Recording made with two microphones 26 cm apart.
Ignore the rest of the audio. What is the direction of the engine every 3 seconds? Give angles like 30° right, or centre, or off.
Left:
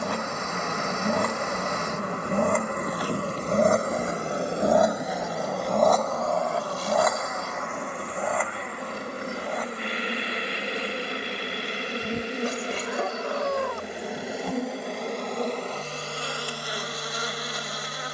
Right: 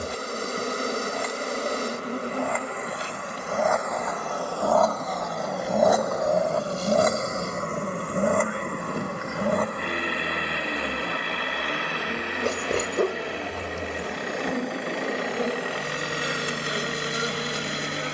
60° left, 20° left, 40° right, 60° right, 70° right, 70° right.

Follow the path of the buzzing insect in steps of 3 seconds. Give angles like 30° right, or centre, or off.
40° right, 10° left, 40° left, 30° left, 10° left, 20° right.